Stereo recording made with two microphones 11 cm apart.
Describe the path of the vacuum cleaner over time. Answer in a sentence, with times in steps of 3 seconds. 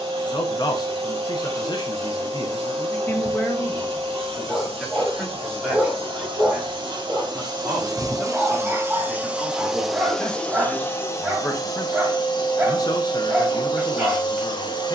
In this clip you hear the vacuum cleaner on the right from 0 s, in the centre from 9 s and on the left from 12 s.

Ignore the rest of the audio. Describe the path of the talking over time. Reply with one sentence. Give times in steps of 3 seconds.
In this clip you hear the talking on the left from 0 s, in the centre from 3 s and on the left from 12 s.